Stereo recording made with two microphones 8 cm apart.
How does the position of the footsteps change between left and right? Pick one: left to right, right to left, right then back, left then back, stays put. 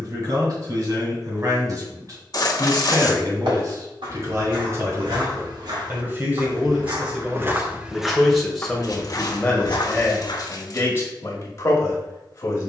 right to left.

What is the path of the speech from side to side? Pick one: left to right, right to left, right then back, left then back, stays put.
right to left.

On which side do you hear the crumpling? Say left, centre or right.
left.